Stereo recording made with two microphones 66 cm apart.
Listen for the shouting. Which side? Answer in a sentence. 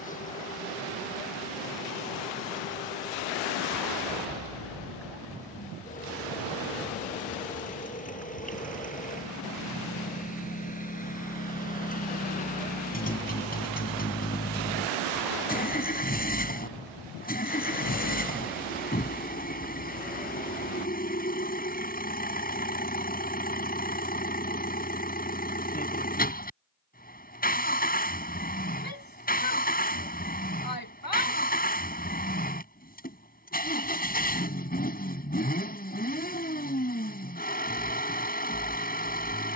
You can hear the shouting on the left.